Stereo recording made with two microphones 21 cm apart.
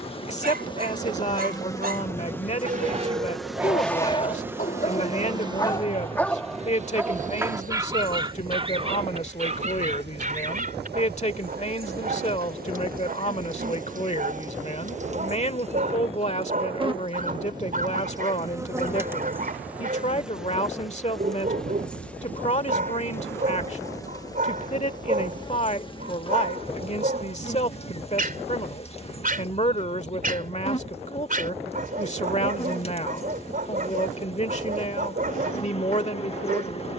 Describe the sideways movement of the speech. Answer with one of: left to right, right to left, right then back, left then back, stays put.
stays put.